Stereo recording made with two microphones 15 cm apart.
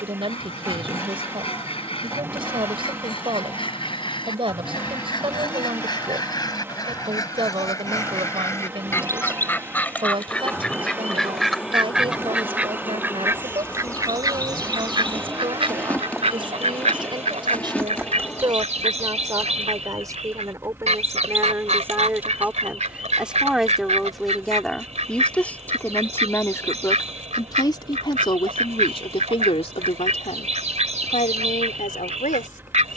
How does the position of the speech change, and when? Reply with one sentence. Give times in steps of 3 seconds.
In this clip you hear the speech on the right from 0 s, in the centre from 21 s and on the left from 27 s.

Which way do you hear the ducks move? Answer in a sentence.
In this clip you hear the ducks go from the left side to the right.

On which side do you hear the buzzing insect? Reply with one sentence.
In this clip you hear the buzzing insect in the centre.